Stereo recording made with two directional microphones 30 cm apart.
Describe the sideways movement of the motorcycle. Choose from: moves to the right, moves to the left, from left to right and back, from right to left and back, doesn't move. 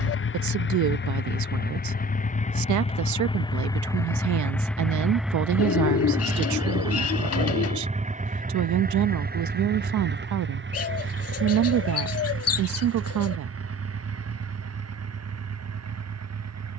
moves to the right.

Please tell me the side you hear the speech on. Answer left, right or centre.
right.